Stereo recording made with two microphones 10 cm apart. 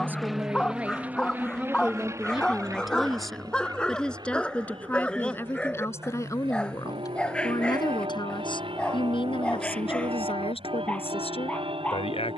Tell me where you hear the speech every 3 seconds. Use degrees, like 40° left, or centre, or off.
10° right, 10° left, 40° left, 70° left.